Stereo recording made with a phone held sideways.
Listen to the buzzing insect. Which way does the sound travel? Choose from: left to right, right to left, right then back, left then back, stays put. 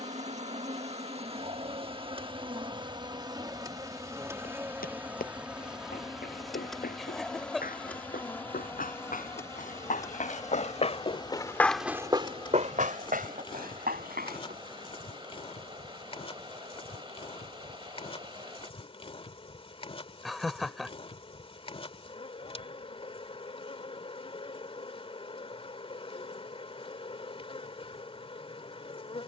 right to left.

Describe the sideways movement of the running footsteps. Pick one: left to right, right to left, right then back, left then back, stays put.
left to right.